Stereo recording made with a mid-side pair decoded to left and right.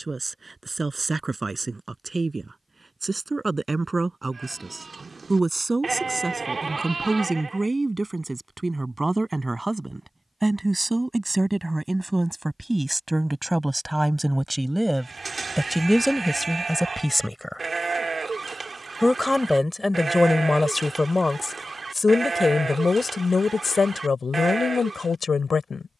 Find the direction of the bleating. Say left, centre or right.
right.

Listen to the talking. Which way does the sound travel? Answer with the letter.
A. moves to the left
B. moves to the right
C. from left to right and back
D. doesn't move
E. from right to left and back
A.